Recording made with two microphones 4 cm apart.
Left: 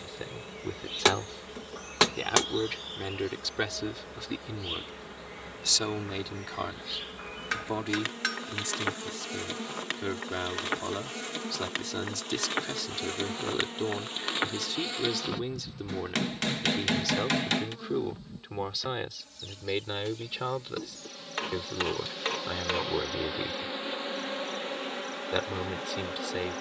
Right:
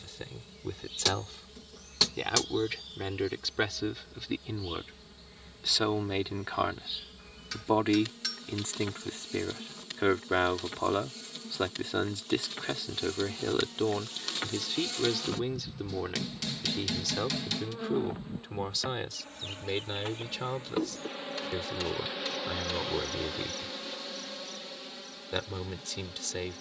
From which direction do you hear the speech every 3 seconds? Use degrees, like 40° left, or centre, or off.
10° left, 10° right, 20° right, 30° right, 10° right, centre, 10° left, 10° left, 10° left.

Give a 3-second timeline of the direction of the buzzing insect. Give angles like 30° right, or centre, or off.
60° left, 60° left, 60° left, 60° left, 40° left, centre, 30° right, centre, 50° left.